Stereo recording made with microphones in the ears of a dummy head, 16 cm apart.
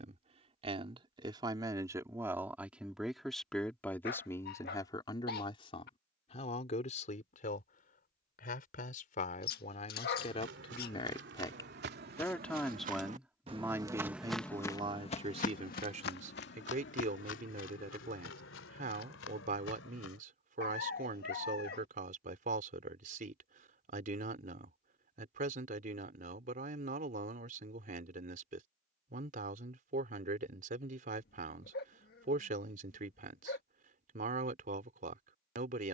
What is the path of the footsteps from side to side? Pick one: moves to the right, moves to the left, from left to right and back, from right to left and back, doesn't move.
moves to the left.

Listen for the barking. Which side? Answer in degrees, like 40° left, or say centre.
60° left.